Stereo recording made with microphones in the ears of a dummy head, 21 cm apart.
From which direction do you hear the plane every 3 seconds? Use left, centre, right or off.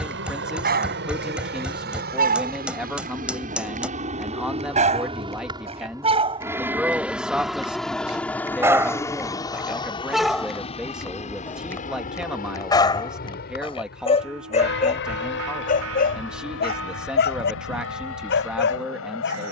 right, right, centre, left, left, left, left.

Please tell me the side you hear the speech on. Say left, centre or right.
centre.